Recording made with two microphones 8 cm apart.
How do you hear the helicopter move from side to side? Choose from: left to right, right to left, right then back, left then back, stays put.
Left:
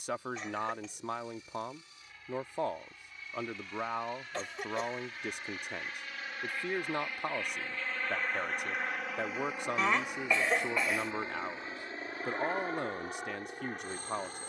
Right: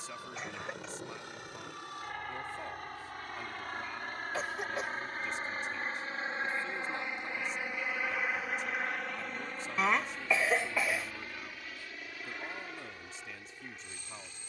right to left.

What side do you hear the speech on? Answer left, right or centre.
left.